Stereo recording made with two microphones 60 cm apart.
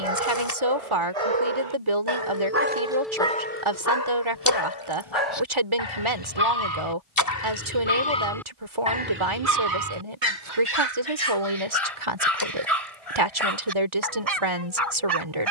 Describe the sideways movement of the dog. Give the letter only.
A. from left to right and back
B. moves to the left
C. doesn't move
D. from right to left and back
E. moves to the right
D.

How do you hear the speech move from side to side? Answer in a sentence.
In this clip you hear the speech stay in one place.